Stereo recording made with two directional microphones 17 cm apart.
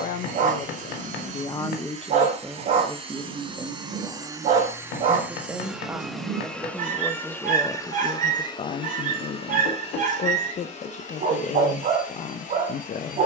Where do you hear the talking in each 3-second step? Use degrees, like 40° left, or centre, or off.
30° left, 20° right, 10° left, 50° left, 50° left.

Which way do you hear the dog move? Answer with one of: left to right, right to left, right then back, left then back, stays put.
stays put.